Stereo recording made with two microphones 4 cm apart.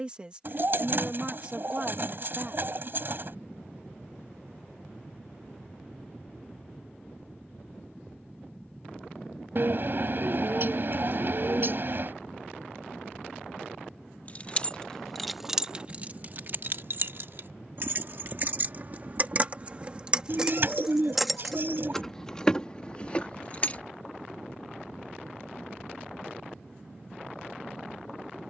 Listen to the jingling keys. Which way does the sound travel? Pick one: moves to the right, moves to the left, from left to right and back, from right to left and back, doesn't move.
from left to right and back.